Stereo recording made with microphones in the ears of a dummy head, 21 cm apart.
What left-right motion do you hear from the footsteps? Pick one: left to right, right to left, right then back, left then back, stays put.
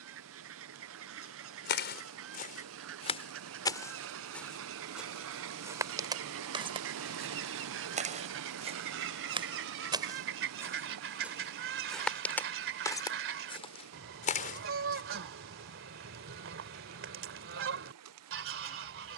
right then back.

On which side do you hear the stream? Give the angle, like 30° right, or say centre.
70° right.